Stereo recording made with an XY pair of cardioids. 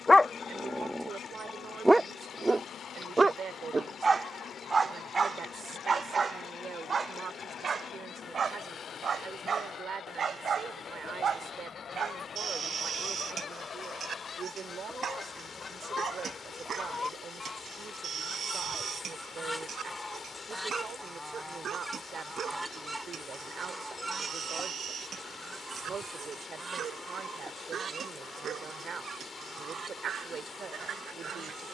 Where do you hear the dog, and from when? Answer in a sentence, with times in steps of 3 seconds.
In this clip you hear the dog in the centre from 0 s and on the right from 3 s.